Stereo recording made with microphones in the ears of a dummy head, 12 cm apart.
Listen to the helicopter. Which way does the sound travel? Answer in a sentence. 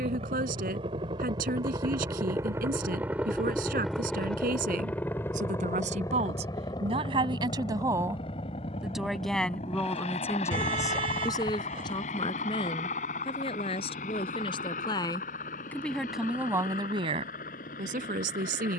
In this clip you hear the helicopter go from the right side to the left.